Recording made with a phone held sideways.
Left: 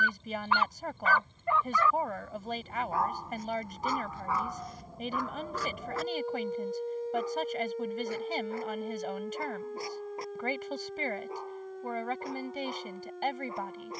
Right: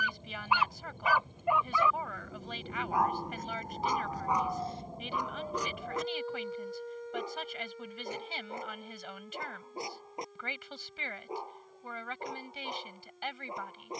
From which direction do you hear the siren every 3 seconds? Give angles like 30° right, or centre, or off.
70° right, 30° right, 40° left, 60° left, 70° left.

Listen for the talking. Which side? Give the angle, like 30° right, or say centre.
40° left.